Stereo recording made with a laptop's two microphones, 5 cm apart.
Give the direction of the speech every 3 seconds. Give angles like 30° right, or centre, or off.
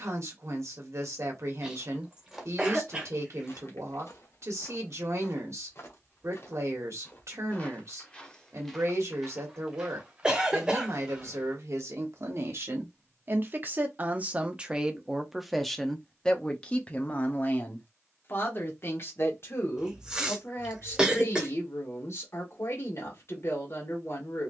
60° right, 60° right, 60° right, 60° right, 40° right, 20° left, 50° left, 60° left.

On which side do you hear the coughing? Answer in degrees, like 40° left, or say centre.
20° right.